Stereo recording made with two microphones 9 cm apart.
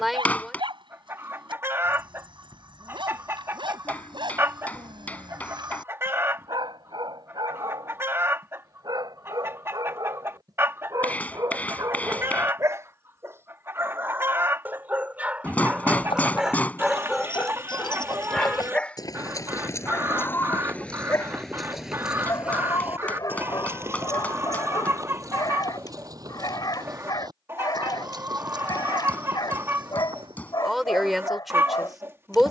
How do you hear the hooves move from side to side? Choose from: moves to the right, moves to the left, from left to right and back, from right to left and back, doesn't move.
moves to the right.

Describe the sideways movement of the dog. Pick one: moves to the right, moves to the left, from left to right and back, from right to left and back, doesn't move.
moves to the left.